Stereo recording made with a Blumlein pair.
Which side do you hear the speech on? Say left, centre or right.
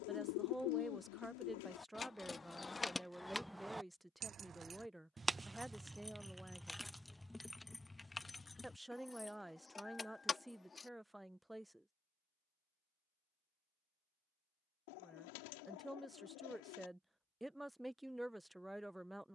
centre.